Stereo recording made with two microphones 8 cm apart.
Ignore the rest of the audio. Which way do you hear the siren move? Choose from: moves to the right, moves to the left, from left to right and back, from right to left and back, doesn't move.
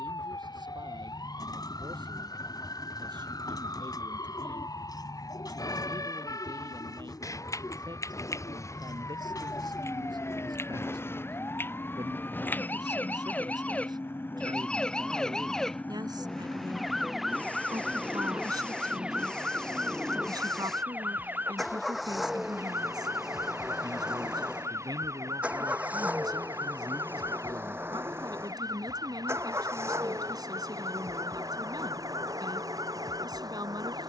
moves to the right.